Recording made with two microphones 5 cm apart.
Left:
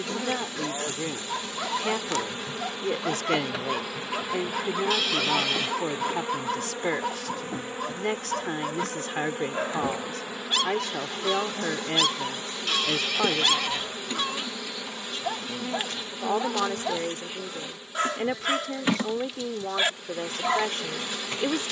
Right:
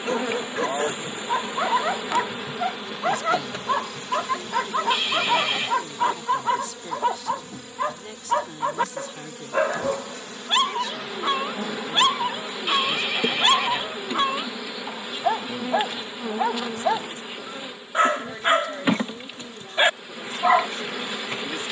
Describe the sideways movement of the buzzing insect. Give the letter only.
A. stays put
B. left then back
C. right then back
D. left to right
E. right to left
B.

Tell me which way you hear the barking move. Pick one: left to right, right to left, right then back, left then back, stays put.
stays put.